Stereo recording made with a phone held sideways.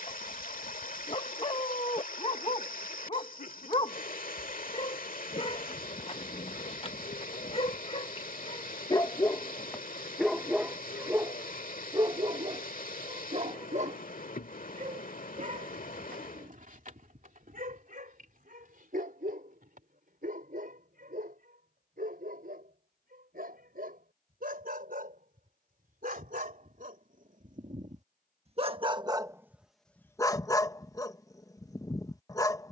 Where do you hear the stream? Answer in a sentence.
In this clip you hear the stream on the left.